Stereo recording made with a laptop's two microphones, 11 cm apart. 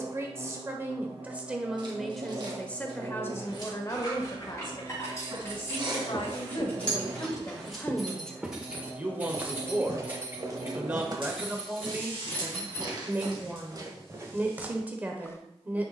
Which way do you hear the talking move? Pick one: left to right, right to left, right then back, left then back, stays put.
left then back.